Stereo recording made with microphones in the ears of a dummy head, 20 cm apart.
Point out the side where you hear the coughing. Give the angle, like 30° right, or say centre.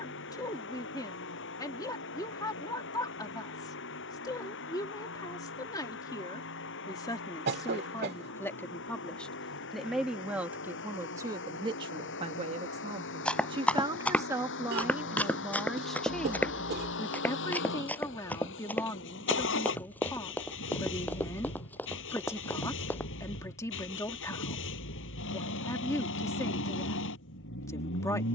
50° right.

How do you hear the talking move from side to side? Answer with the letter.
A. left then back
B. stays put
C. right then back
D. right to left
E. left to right
C.